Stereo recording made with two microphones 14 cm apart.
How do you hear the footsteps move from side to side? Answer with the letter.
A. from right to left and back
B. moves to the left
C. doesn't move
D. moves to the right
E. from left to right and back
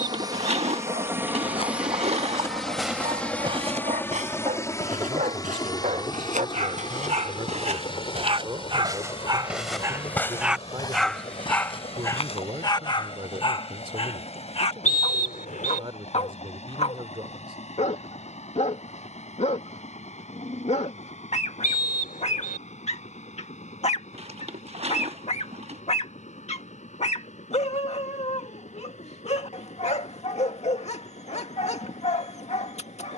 E.